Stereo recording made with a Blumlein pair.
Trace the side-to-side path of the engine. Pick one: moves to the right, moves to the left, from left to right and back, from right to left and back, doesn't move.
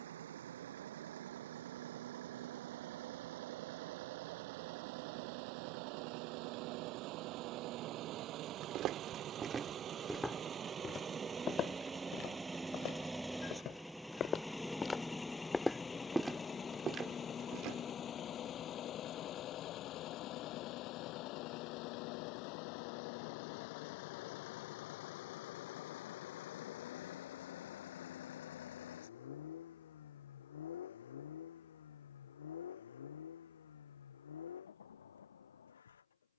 moves to the left.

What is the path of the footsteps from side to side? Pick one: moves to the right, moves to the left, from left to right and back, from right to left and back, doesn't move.
from right to left and back.